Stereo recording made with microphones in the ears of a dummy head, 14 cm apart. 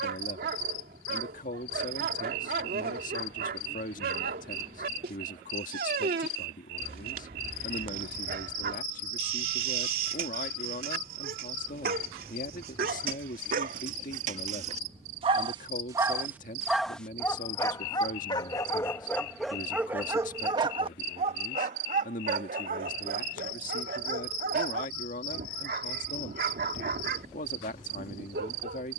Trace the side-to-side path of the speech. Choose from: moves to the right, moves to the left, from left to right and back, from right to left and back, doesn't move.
doesn't move.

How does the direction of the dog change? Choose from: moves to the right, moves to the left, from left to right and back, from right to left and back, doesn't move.
from right to left and back.